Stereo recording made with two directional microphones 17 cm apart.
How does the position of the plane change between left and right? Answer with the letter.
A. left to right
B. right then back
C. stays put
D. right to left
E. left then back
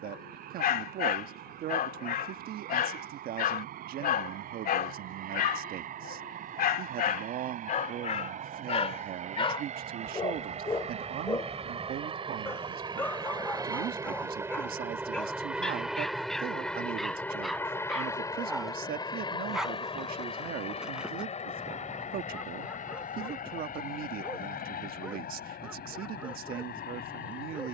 D.